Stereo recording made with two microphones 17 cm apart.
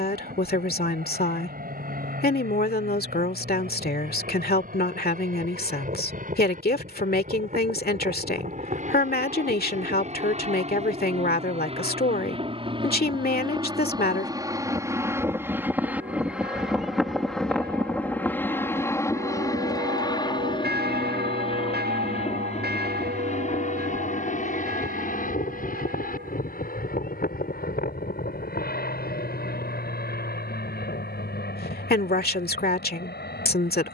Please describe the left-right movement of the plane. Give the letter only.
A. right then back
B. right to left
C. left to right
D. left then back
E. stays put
B.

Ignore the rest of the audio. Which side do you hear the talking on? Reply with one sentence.
You can hear the talking on the left.